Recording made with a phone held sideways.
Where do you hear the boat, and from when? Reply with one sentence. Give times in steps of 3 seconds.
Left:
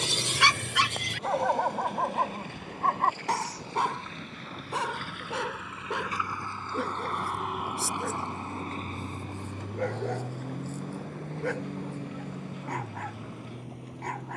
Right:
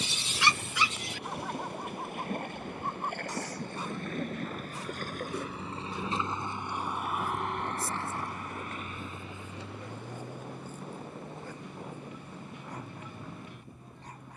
In this clip you hear the boat on the right from 0 s, in the centre from 6 s and on the left from 9 s.